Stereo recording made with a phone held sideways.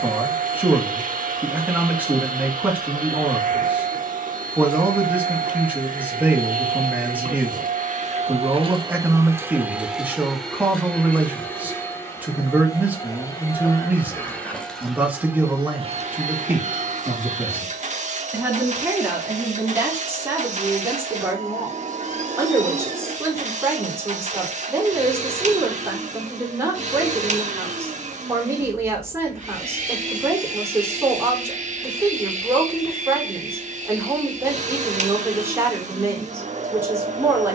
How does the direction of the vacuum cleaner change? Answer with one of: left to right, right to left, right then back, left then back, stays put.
left then back.